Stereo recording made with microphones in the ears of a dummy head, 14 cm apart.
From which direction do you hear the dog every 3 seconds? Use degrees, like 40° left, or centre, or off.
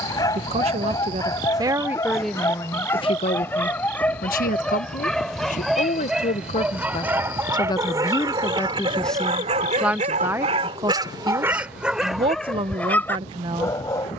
20° left, 10° left, 20° right, 30° right, 10° left.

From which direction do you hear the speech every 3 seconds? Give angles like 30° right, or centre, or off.
10° right, 50° left, 30° left, 10° right, 30° right.